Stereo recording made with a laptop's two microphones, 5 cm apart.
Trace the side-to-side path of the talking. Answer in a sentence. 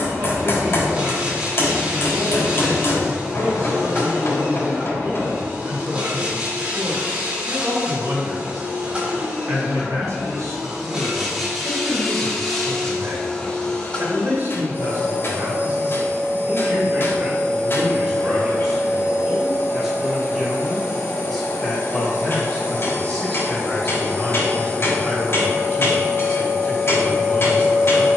In this clip you hear the talking go from the right side to the left.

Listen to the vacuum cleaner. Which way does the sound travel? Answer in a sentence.
You can hear the vacuum cleaner move to the left.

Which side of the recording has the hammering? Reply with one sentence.
In this clip you hear the hammering on the left.